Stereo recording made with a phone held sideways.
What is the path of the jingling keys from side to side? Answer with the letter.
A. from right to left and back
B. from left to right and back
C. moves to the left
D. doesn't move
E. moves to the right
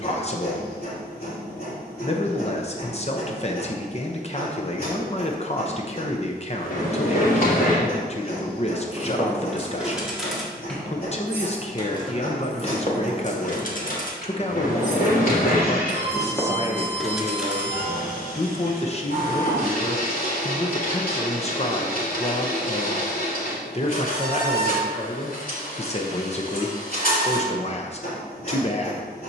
A.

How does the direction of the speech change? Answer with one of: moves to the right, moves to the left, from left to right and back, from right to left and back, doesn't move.
doesn't move.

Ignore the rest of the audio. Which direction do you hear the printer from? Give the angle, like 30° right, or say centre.
60° left.